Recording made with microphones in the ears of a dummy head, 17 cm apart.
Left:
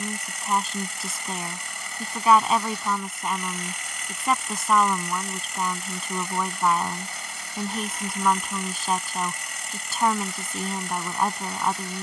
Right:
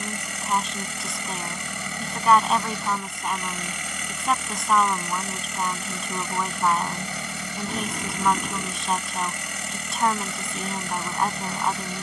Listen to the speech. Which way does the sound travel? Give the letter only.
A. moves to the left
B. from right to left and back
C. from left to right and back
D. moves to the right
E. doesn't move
E.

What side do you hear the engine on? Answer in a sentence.
You can hear the engine on the right.